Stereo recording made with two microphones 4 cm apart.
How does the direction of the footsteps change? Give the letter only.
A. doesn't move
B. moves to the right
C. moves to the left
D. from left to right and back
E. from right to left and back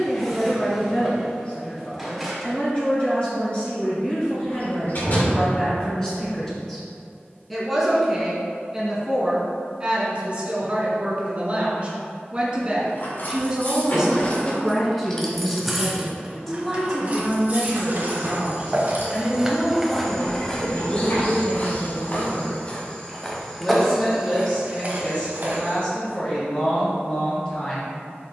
E.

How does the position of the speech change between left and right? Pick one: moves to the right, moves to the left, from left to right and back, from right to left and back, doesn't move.
from left to right and back.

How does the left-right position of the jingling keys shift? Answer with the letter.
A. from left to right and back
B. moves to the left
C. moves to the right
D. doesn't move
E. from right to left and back
C.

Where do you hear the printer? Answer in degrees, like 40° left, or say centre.
centre.